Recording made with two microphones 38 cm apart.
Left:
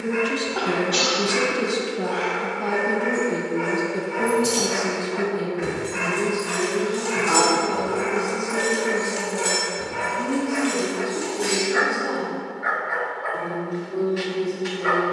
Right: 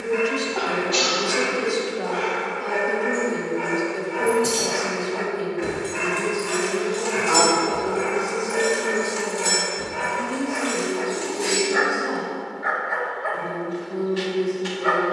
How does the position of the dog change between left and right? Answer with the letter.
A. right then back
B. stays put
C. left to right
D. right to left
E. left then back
B.